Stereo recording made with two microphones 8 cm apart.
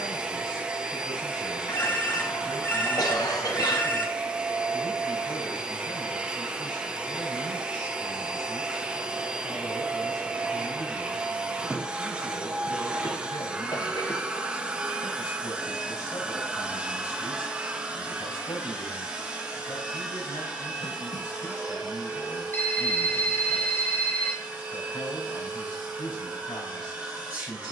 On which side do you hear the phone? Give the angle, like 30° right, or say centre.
20° left.